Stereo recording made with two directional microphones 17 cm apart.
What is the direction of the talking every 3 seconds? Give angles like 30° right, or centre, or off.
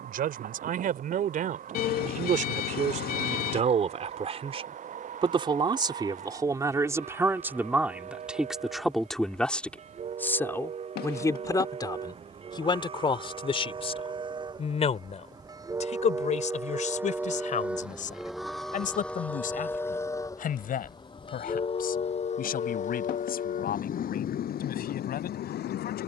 50° right, 40° right, 10° right, 10° left, 30° left, 40° left, 50° left, 60° left, 60° left.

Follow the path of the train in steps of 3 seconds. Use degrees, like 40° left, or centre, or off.
50° right, 50° right, 50° right, 40° right, 30° right, 20° right, 10° left, 40° left, 60° left.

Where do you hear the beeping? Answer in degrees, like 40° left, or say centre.
60° left.